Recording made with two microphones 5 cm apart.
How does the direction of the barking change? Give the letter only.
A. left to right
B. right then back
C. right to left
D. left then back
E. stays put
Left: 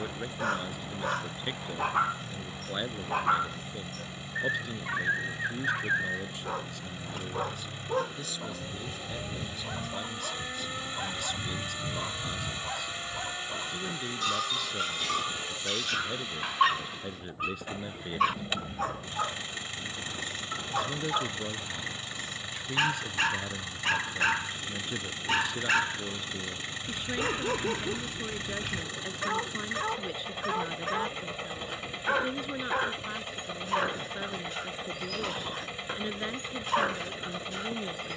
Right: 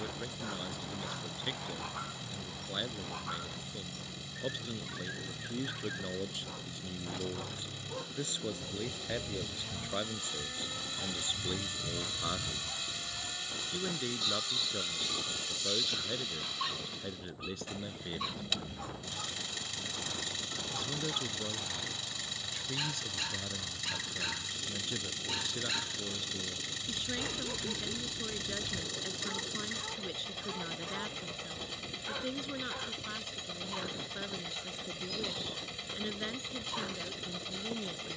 E.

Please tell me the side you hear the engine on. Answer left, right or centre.
left.